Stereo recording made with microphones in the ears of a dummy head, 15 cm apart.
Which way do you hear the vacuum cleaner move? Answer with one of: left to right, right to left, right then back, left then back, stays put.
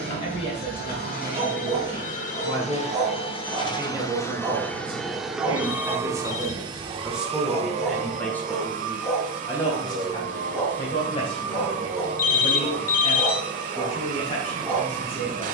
left to right.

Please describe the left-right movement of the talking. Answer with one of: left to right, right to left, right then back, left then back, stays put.
right then back.